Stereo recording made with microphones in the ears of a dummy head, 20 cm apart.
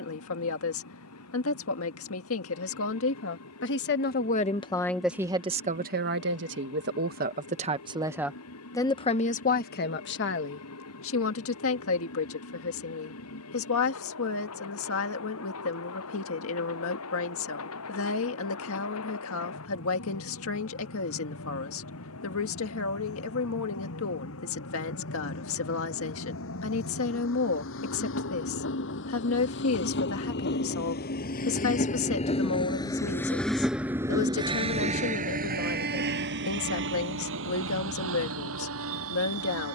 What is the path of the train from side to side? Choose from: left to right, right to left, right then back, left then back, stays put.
left to right.